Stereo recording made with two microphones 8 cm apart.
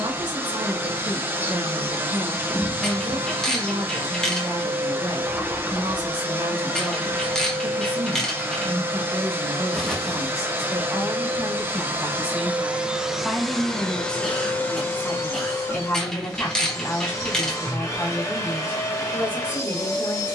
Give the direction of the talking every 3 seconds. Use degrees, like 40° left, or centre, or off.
60° right, 60° right, 60° right, 40° right, centre, 20° left, 30° left.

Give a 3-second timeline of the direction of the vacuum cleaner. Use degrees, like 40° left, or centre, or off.
30° right, 30° right, 30° right, 30° right, centre, 30° left, 30° left.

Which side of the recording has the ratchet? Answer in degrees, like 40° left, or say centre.
10° left.